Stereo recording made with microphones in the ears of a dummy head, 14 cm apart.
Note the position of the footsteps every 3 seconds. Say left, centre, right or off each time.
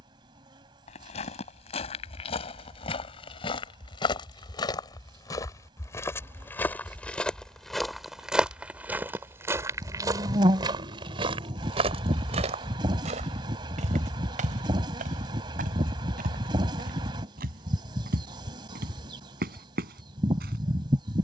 left, left, centre, right, right, right, right.